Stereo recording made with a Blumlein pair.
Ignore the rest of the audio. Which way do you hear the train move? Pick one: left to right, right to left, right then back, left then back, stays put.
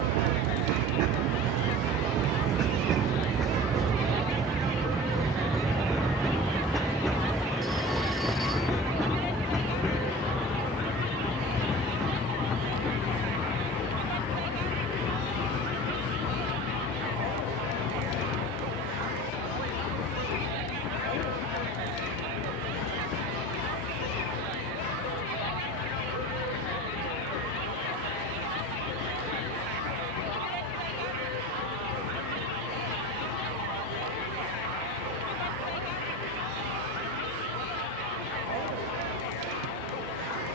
right to left.